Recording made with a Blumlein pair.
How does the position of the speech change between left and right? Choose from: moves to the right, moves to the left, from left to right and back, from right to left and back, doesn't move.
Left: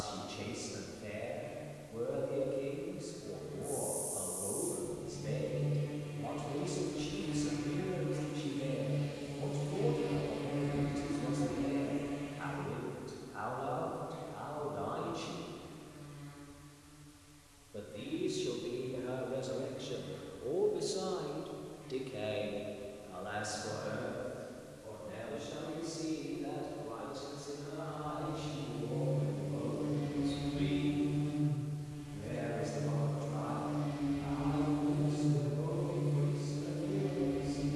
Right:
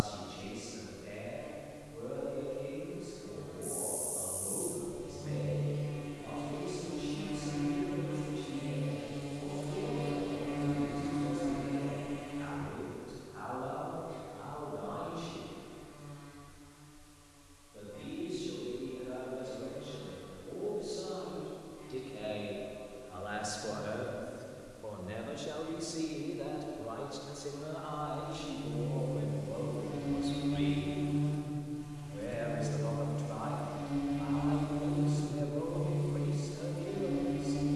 moves to the right.